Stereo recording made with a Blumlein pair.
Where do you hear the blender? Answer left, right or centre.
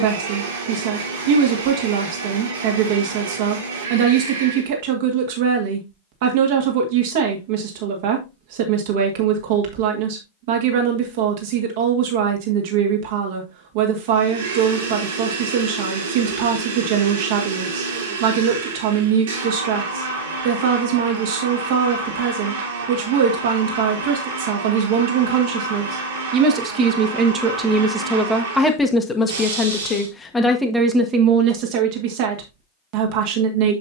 right.